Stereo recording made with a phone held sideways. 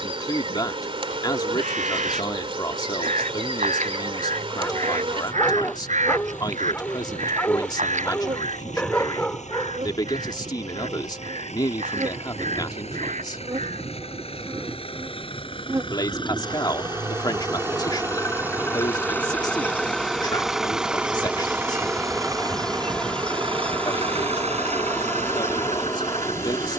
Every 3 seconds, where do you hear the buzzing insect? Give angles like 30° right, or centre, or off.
40° right, 40° right, 40° right, 40° right, 30° right, 20° right, 10° right, centre, 20° left.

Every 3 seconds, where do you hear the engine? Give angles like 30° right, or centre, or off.
60° left, 60° left, 60° left, 50° left, 40° left, 30° left, 10° left, 30° right, 50° right.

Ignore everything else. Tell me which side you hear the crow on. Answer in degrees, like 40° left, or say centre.
50° right.